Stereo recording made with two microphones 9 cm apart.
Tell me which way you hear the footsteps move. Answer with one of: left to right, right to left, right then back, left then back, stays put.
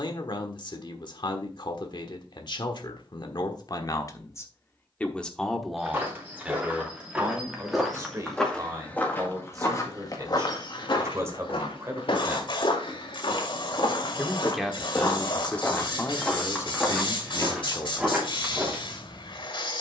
left then back.